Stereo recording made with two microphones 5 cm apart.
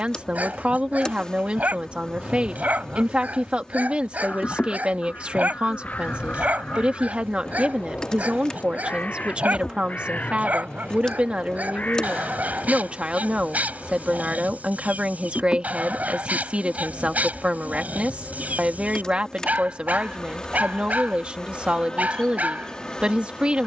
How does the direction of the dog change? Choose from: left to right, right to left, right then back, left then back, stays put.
stays put.